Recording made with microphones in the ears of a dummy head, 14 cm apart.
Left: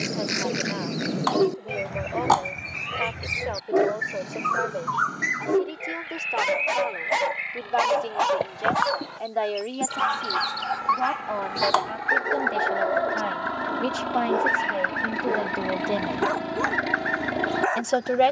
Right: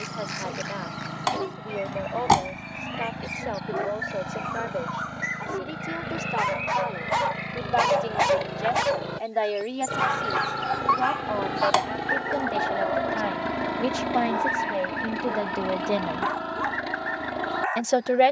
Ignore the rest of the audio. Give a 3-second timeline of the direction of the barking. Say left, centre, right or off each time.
left, left, centre, centre, left, left.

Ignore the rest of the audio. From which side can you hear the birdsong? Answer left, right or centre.
left.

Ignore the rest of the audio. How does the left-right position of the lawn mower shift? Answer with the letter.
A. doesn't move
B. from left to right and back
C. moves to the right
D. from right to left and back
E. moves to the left
E.